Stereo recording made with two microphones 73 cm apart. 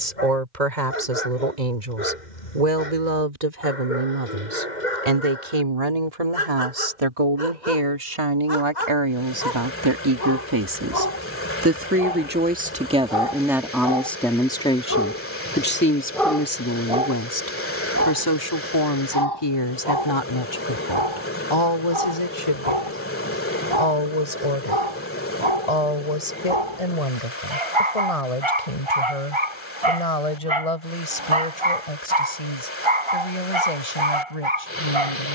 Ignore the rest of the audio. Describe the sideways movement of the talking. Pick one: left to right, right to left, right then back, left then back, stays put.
right to left.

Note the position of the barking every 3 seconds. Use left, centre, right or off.
left, left, left, left, left, centre, right, right, right, right, right, right.